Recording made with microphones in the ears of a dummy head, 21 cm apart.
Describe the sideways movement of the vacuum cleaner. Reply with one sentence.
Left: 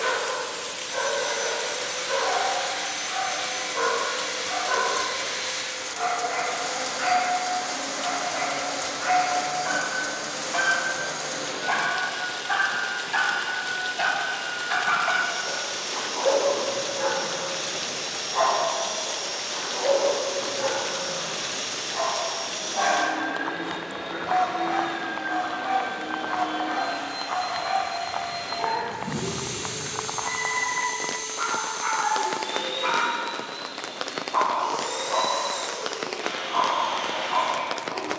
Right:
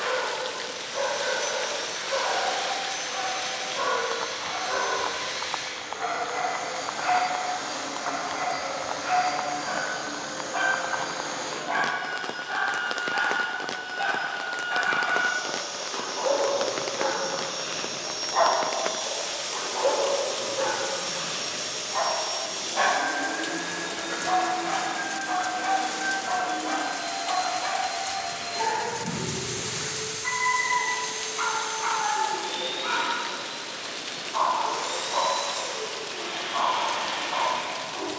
In this clip you hear the vacuum cleaner stay put.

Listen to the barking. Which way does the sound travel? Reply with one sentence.
In this clip you hear the barking go right and come back.